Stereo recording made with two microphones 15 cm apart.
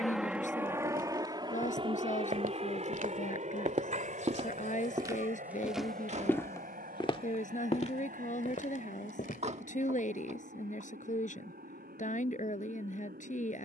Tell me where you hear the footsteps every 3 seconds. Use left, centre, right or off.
right, right, left, left, off.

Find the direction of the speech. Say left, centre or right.
left.